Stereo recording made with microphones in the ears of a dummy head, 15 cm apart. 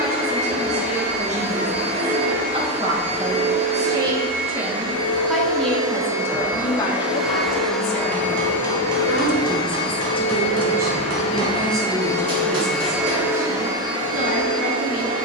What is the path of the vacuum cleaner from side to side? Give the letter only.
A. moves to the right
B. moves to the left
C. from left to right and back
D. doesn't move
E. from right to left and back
E.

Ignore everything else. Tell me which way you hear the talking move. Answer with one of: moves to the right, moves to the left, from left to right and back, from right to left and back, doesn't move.
from right to left and back.